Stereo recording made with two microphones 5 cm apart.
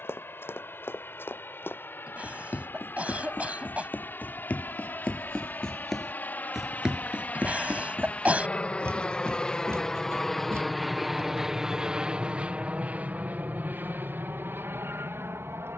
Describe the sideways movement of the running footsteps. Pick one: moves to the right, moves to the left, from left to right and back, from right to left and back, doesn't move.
moves to the right.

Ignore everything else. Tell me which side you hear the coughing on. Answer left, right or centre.
right.